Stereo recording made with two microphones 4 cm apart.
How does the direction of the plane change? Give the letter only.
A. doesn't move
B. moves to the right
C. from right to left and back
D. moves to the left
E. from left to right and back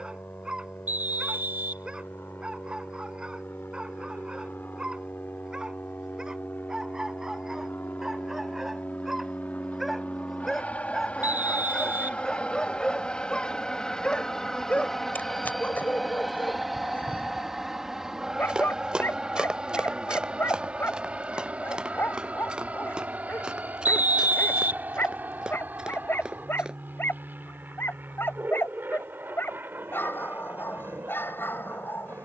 B.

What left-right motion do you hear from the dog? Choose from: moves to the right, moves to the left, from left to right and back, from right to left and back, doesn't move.
moves to the left.